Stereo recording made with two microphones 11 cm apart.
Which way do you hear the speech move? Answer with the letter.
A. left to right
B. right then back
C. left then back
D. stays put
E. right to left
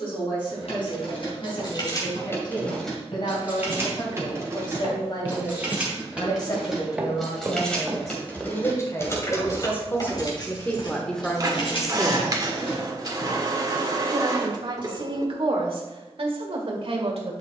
A.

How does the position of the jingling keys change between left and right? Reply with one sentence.
In this clip you hear the jingling keys move from left to right and back again.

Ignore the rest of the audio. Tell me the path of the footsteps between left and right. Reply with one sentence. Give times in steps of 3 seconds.
You can hear the footsteps on the left from 0 s, in the centre from 6 s, on the left from 9 s and not at all from 15 s.